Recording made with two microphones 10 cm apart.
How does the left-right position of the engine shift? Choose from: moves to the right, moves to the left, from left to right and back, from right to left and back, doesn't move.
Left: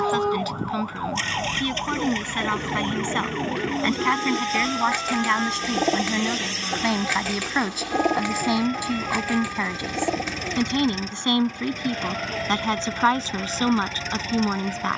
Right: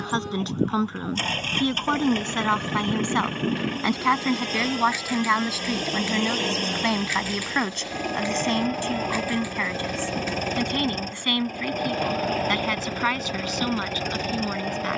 doesn't move.